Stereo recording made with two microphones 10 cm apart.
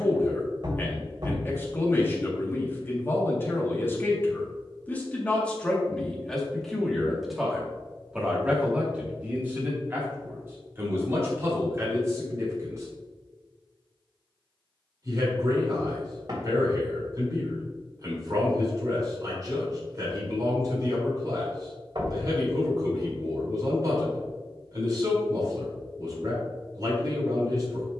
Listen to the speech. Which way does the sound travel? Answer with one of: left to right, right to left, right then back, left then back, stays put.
left to right.